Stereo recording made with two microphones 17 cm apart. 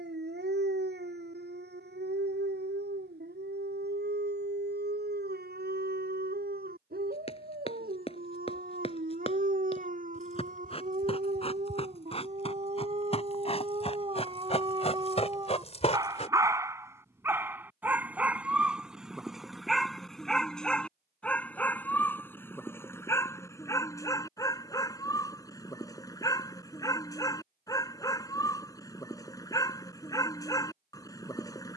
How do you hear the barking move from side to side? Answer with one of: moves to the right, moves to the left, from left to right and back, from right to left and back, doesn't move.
moves to the left.